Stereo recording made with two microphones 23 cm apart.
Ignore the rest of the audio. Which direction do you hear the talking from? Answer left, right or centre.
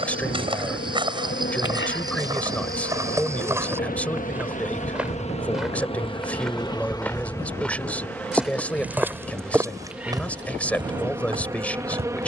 centre.